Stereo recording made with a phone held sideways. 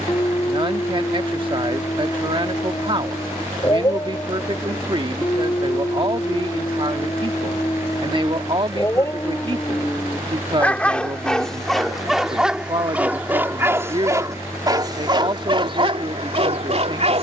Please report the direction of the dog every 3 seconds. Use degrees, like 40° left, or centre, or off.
30° left, 30° left, 30° left, 10° left, 10° right, 40° right.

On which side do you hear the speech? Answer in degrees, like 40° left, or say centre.
40° right.